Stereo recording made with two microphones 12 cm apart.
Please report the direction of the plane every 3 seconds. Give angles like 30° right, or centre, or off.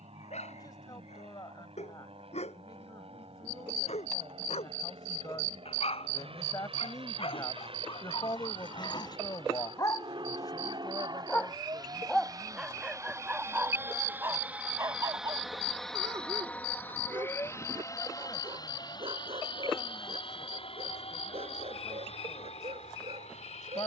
70° right, 60° right, 60° right, 50° right, 20° right, 10° left, 40° left, 60° left.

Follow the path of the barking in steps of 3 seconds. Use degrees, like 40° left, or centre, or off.
70° left, 70° left, 50° left, 30° left, 10° right, 40° right, 50° right, 60° right.